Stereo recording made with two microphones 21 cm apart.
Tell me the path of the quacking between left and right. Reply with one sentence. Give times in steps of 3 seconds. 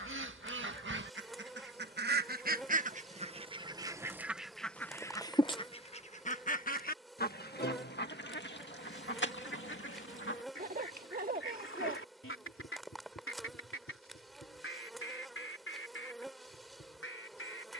You can hear the quacking on the right from 0 s, in the centre from 3 s and on the left from 6 s.